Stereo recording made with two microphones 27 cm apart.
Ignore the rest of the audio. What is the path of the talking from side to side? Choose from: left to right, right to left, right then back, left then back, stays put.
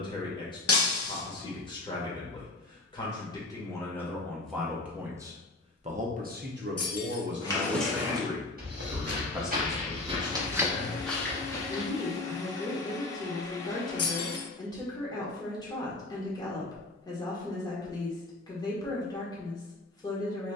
right then back.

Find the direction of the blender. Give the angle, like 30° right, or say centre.
10° left.